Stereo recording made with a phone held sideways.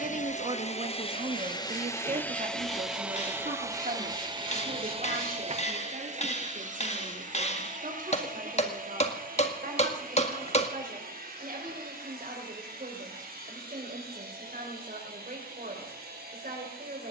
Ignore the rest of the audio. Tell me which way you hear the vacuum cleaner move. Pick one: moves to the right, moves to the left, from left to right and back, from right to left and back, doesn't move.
moves to the right.